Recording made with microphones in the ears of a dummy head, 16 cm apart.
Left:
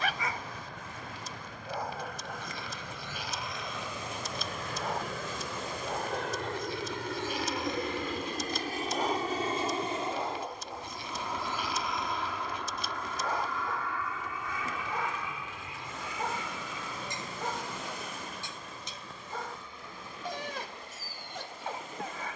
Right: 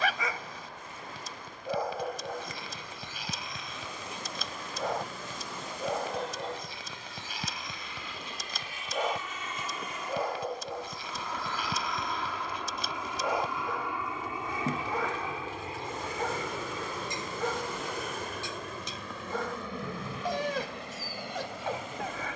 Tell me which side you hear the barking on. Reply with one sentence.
You can hear the barking on the right.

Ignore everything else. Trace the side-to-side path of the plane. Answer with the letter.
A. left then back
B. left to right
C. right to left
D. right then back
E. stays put
B.